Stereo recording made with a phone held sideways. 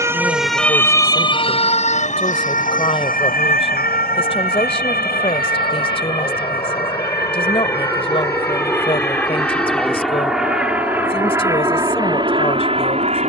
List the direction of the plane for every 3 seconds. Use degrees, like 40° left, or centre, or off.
50° left, 40° left, 30° left, centre, 30° right.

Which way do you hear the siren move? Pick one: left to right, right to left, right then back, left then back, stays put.
right to left.